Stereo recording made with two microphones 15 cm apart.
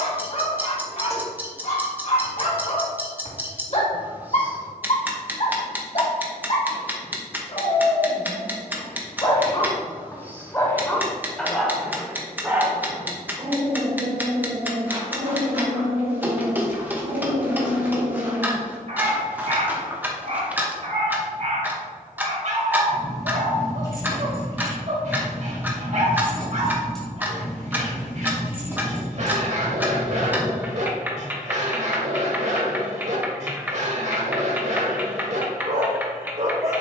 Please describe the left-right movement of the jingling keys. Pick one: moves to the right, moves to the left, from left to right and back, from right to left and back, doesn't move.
moves to the right.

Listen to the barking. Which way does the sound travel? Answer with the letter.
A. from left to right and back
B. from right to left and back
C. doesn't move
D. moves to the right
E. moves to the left
D.